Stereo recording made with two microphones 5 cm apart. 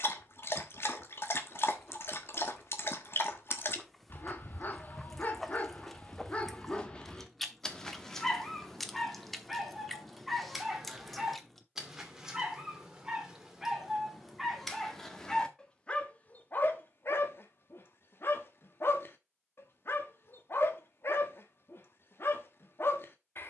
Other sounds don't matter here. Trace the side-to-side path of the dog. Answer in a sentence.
You can hear the dog move from left to right and back again.